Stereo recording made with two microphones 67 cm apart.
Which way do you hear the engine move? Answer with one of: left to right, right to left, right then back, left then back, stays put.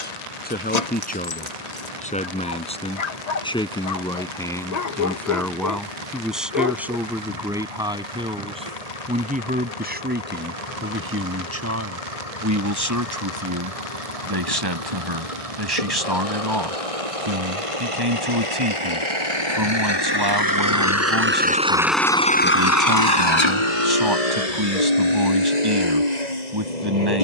right to left.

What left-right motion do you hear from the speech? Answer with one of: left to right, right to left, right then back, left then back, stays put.
left to right.